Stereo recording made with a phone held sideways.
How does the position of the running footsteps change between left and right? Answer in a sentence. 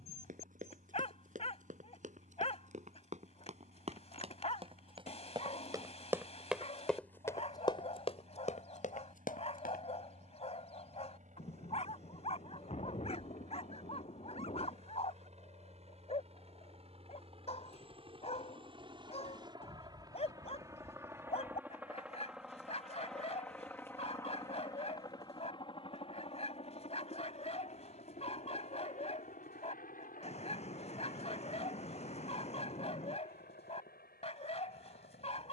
You can hear the running footsteps move to the left.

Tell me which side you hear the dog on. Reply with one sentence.
In this clip you hear the dog on the left.